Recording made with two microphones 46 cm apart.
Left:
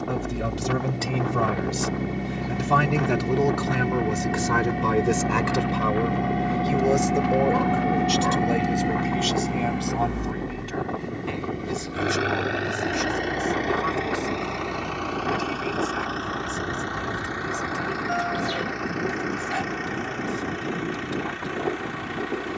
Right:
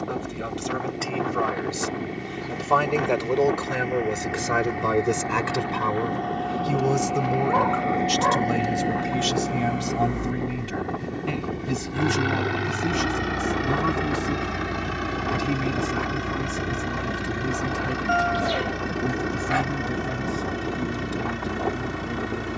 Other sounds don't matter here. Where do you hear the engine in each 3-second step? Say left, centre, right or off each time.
left, left, left, centre, right, right, right, right.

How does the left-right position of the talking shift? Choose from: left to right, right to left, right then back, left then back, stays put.
left to right.